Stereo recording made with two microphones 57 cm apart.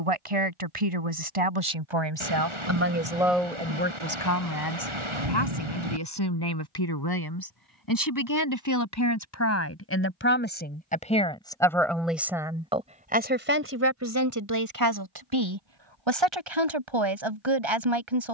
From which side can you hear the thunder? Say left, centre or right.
right.